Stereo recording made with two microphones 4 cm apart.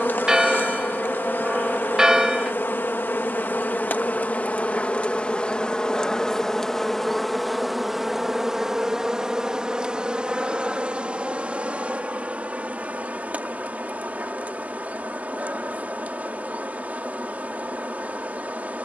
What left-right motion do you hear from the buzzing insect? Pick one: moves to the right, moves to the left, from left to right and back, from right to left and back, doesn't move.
moves to the right.